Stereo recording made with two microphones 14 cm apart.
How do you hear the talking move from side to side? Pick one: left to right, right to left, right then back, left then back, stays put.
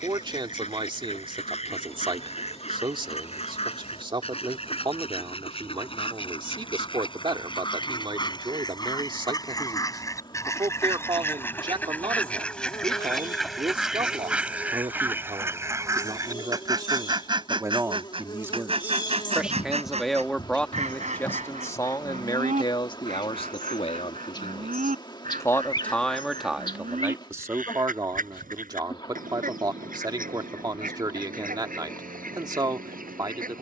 left then back.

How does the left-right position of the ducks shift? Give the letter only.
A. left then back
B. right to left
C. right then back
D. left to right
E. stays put
D.